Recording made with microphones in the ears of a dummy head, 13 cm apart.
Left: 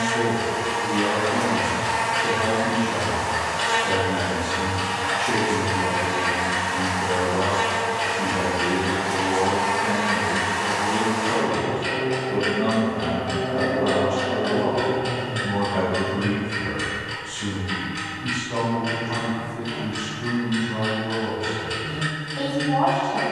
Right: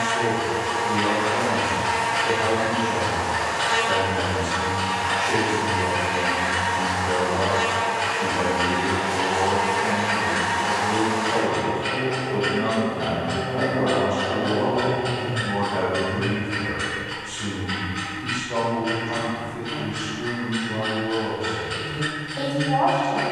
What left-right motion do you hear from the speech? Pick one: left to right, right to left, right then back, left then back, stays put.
left to right.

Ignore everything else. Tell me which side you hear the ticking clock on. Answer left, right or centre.
left.